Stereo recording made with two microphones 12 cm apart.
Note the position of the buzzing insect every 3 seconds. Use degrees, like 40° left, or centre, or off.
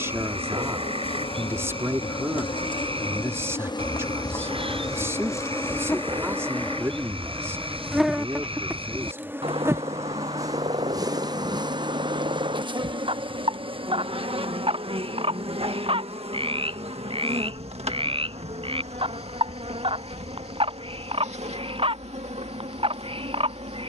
50° left, 30° left, centre, 30° right, 50° right, 60° right, 70° right, 70° right.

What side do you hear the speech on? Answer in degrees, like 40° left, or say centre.
20° right.